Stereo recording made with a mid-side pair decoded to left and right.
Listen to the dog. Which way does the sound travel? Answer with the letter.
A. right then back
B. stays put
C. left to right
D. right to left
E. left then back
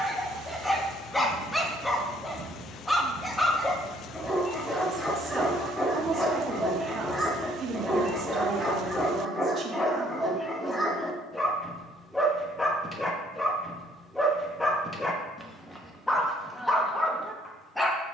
B.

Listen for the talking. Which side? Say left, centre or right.
right.